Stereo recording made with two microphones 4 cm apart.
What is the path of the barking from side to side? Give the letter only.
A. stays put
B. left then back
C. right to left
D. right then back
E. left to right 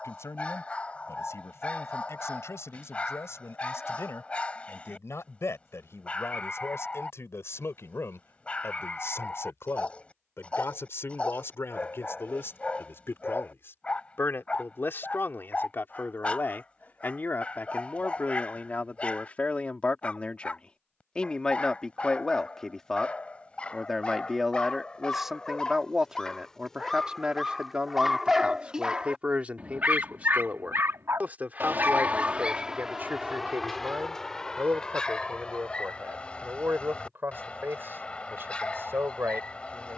D.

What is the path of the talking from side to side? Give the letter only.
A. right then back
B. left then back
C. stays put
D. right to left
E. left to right
E.